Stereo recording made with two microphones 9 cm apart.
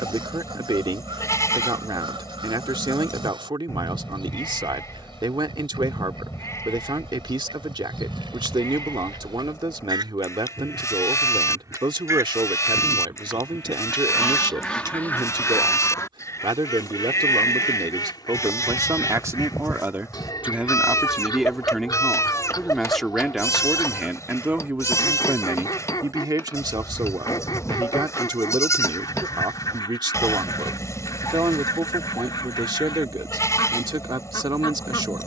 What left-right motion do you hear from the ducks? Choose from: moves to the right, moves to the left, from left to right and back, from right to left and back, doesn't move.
moves to the left.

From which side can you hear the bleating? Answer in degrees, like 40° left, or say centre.
30° left.